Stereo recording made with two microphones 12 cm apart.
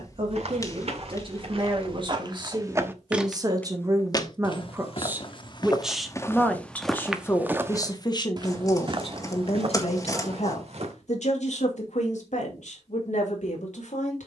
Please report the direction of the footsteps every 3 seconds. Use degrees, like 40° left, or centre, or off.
40° right, 30° left, 10° right, 50° right, off.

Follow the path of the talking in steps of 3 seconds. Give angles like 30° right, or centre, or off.
40° right, 20° right, 30° left, 60° left, 80° left.